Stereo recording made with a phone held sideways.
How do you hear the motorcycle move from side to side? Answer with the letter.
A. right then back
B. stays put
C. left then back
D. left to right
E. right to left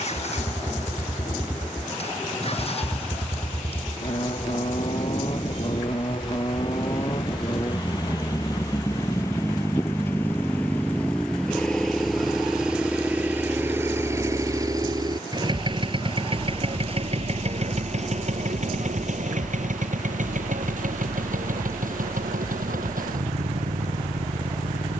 D.